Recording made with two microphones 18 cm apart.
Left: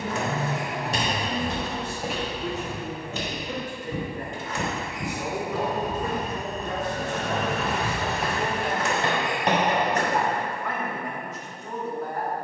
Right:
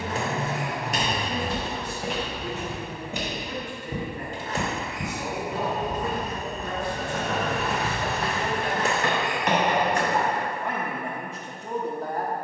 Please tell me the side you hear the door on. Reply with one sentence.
In this clip you hear the door on the right.